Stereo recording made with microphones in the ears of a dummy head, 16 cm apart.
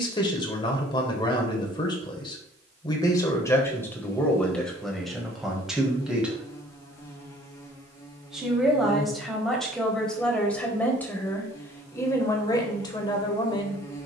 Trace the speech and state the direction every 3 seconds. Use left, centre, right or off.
left, centre, centre, centre, left.